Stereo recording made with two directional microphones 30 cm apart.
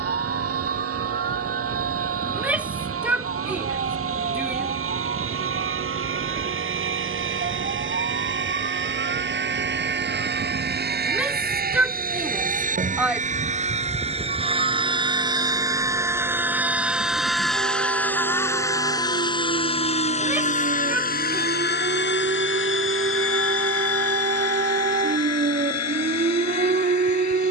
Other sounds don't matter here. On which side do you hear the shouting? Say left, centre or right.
centre.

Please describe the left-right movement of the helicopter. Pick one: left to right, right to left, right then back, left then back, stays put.
right to left.